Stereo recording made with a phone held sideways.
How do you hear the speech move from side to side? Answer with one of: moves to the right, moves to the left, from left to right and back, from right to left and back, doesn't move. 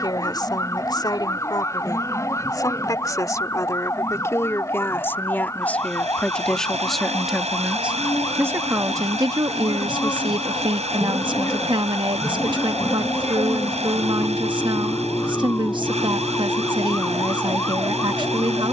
moves to the right.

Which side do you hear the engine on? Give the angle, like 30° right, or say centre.
50° right.